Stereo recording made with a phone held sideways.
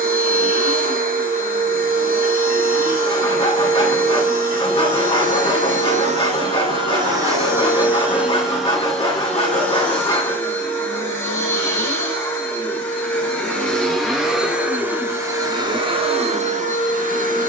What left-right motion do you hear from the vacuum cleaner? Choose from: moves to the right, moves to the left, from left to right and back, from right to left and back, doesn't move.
from right to left and back.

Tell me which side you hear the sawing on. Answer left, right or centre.
left.